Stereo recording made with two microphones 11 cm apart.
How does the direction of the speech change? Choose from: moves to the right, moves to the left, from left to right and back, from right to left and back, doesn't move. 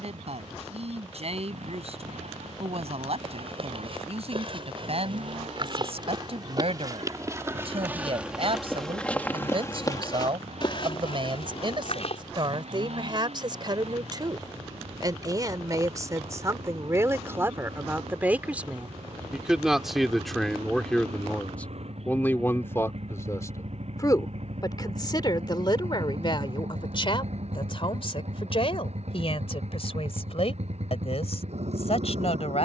moves to the left.